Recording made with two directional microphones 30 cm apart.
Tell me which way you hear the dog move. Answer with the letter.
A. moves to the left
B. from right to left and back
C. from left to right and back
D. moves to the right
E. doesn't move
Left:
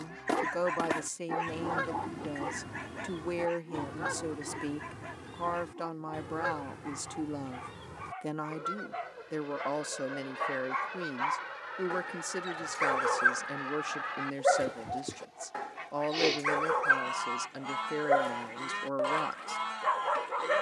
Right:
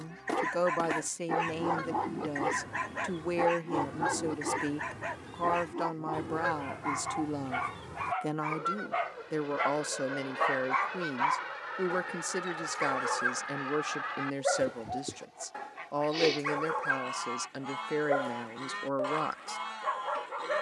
C.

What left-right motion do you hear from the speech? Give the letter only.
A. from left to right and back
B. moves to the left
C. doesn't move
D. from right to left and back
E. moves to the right
C.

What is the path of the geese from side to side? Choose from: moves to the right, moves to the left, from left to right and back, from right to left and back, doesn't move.
from left to right and back.